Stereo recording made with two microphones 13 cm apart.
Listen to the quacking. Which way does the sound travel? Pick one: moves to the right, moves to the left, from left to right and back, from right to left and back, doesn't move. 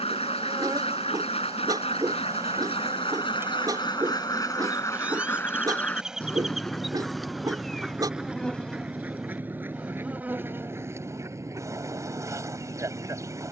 moves to the right.